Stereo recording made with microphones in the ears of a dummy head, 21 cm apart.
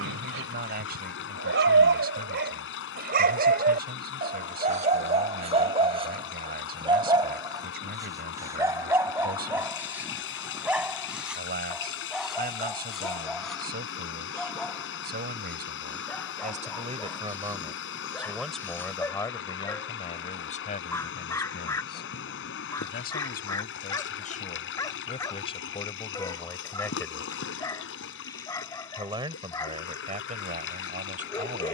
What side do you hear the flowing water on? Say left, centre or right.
left.